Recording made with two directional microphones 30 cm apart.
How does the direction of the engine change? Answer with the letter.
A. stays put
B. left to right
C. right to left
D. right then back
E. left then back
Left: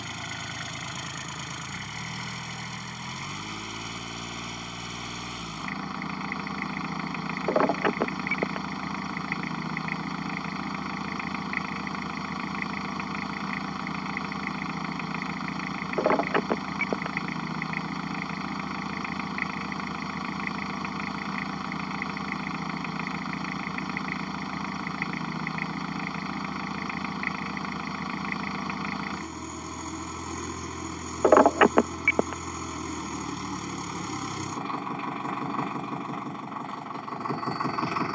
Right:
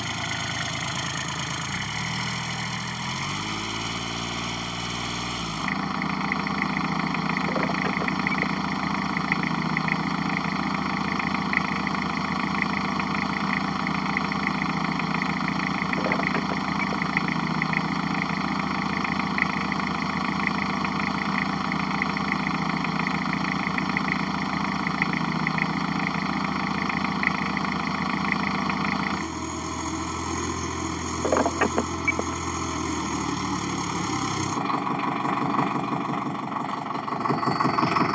A.